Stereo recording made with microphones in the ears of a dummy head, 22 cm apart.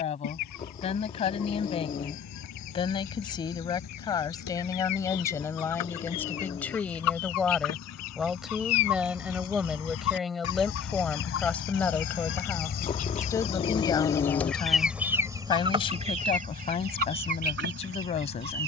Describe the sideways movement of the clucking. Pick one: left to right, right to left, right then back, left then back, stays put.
left to right.